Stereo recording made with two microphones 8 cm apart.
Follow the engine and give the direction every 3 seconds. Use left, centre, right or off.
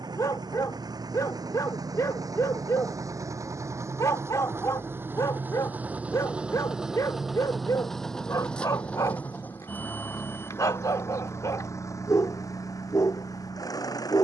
right, right, centre, left, left.